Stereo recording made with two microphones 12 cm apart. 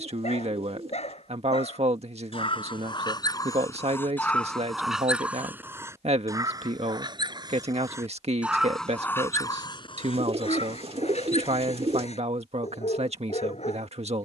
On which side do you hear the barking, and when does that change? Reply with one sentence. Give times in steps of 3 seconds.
In this clip you hear the barking on the left from 0 s, in the centre from 3 s, on the right from 6 s and on the left from 9 s.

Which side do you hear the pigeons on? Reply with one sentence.
You can hear the pigeons on the right.